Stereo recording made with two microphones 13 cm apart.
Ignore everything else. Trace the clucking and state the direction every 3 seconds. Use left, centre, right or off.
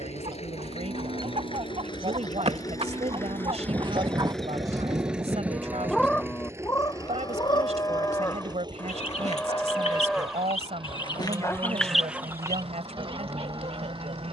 right, right, left, left, right.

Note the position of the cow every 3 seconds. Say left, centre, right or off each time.
right, right, left, centre, right.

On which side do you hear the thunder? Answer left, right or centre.
right.